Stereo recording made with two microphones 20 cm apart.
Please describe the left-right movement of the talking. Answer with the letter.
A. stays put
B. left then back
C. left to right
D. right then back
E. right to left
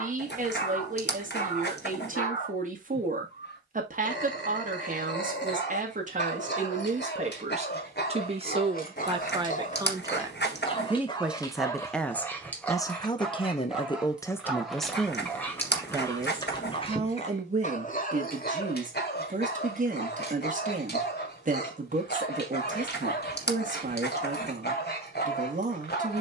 B.